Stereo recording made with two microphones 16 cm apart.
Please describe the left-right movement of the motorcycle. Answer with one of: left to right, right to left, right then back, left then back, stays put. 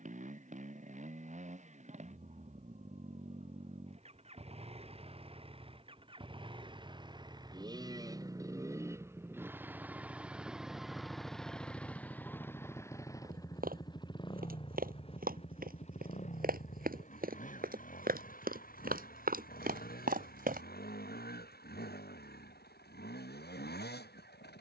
right to left.